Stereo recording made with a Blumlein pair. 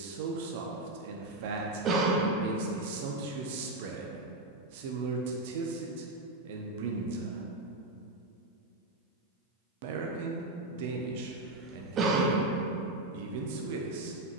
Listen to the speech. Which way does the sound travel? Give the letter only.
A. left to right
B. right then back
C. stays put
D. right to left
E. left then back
C.